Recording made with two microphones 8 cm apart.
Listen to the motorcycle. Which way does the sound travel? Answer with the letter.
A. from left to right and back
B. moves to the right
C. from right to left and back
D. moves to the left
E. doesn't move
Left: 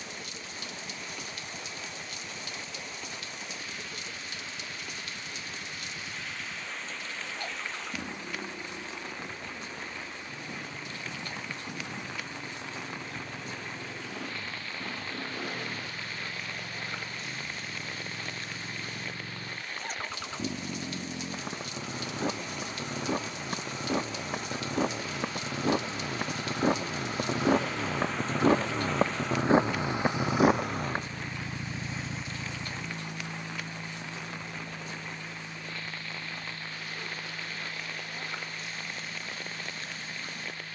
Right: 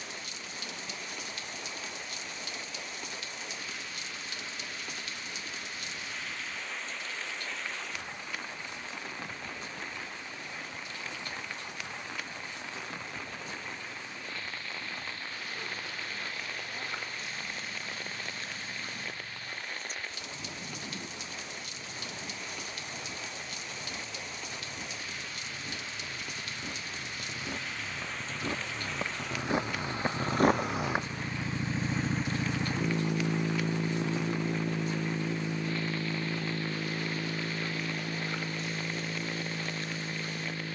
B.